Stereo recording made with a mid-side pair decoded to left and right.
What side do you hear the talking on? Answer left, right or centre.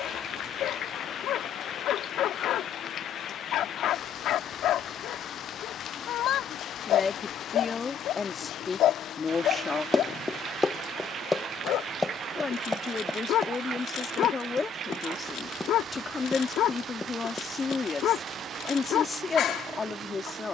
left.